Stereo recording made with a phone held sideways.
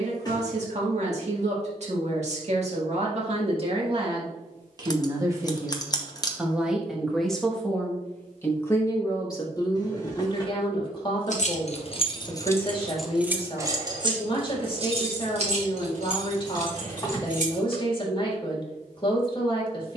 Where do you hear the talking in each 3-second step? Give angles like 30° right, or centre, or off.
50° right, 30° right, 10° left, 30° left, 40° left, 40° left, 40° left.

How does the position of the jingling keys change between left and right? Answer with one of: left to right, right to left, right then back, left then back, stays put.
left to right.